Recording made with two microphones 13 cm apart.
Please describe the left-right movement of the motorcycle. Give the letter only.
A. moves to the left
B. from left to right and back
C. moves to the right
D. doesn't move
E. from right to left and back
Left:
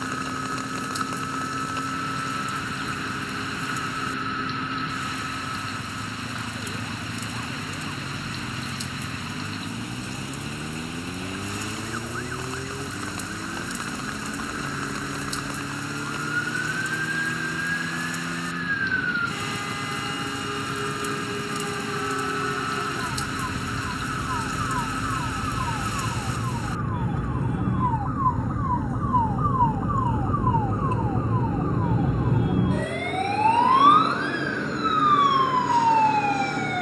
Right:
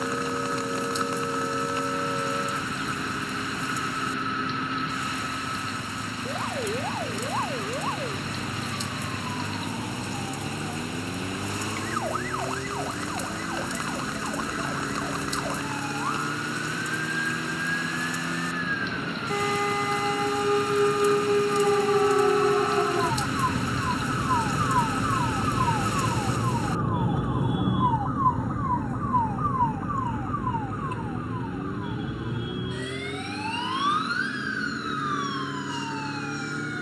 D.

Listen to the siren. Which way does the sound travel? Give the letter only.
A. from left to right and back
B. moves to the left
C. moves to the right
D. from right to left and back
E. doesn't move
B.